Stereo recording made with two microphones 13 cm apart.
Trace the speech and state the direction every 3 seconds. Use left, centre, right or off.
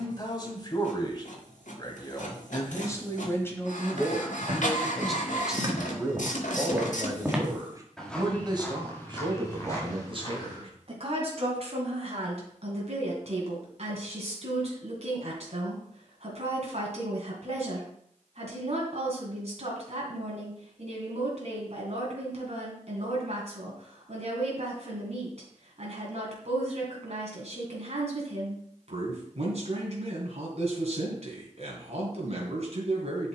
left, centre, right, right, right, right, right, right, right, right, right.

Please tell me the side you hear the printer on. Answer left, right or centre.
left.